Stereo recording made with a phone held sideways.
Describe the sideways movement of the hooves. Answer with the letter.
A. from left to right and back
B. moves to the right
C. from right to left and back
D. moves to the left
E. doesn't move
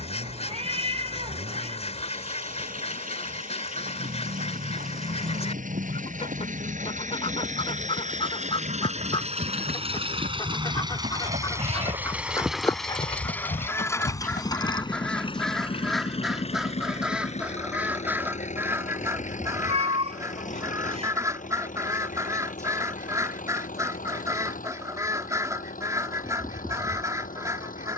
D.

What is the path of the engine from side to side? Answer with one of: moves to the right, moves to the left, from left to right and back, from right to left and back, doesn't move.
moves to the left.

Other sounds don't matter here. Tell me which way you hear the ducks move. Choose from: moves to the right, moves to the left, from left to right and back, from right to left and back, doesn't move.
moves to the right.